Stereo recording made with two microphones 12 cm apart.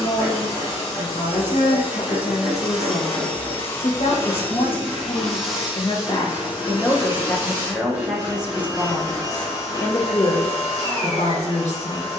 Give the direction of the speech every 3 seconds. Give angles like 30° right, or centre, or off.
70° left, 50° left, centre, 50° left.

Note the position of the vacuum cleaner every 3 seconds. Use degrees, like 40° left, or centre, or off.
20° right, 10° left, 20° right, 30° right.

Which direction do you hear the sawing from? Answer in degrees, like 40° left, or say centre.
10° right.